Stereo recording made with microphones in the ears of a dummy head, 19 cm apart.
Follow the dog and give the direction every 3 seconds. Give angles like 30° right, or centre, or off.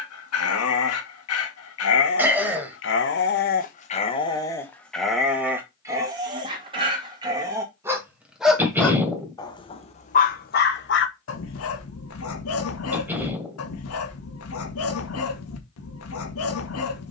70° left, 20° left, 20° right, 50° left, 80° left, 80° left.